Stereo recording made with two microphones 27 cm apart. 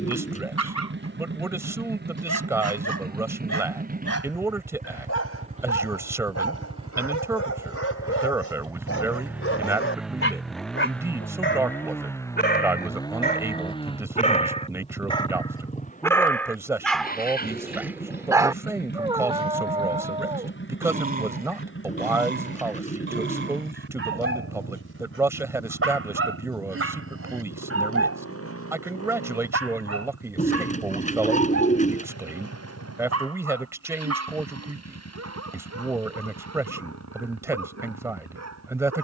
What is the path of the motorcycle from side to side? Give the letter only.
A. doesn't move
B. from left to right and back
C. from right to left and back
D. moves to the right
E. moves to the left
E.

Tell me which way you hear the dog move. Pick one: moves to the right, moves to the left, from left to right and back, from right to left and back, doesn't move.
moves to the right.